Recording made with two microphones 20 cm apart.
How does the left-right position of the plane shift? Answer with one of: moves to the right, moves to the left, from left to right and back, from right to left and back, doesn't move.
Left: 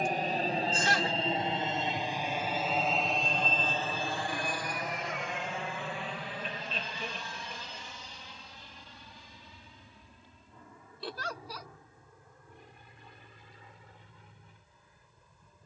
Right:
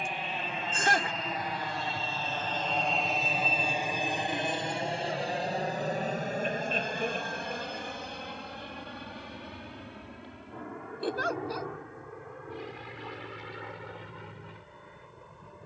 moves to the right.